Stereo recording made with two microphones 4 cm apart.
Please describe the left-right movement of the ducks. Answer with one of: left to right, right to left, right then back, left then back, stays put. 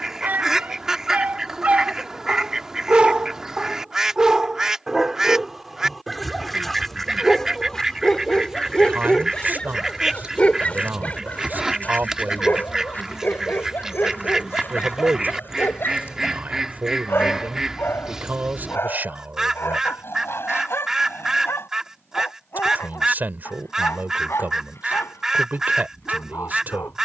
stays put.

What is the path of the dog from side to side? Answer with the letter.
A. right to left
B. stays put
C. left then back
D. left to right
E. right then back
A.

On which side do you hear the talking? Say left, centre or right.
right.